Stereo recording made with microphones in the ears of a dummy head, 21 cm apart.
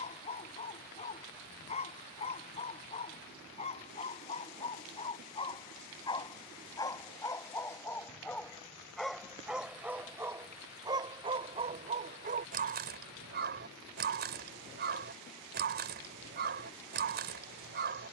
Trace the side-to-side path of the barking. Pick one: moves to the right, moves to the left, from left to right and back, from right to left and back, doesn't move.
moves to the right.